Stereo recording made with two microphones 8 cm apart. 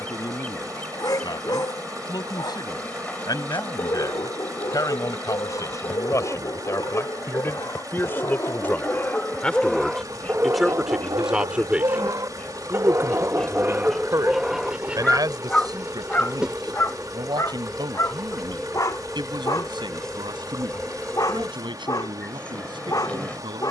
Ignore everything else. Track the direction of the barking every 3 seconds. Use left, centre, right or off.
left, left, left, right, right, left, left, left.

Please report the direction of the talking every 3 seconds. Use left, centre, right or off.
left, left, left, centre, right, right, right, right.